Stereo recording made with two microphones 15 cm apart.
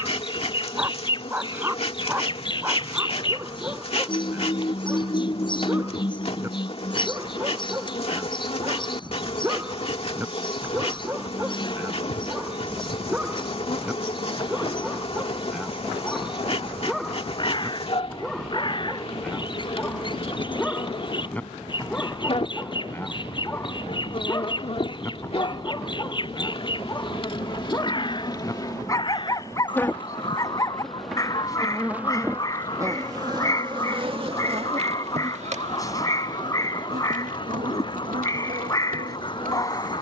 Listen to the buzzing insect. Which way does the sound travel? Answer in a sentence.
You can hear the buzzing insect travel towards the right.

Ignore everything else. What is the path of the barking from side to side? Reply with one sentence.
You can hear the barking travel towards the left.